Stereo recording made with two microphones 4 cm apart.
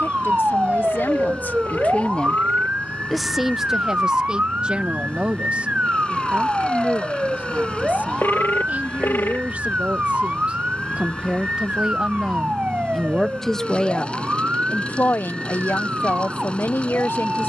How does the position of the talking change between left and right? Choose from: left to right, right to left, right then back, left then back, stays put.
right then back.